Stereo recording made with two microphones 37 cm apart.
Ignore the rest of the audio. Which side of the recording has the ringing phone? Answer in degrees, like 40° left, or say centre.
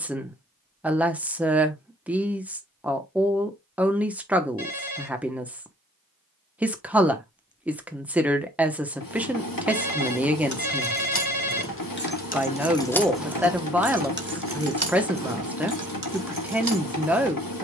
70° left.